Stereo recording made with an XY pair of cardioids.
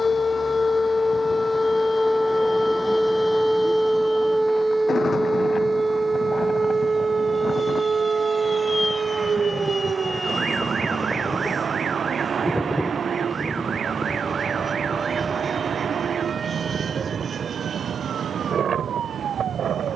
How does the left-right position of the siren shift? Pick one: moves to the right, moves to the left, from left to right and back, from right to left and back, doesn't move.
moves to the right.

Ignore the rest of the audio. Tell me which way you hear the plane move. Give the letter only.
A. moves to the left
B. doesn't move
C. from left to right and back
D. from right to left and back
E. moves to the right
E.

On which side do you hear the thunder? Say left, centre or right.
left.